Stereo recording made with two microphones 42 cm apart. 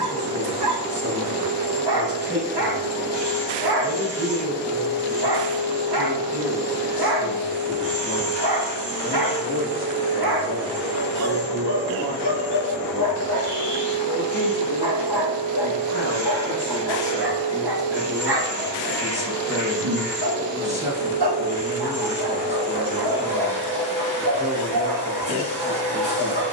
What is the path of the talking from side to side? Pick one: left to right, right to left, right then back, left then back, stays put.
left then back.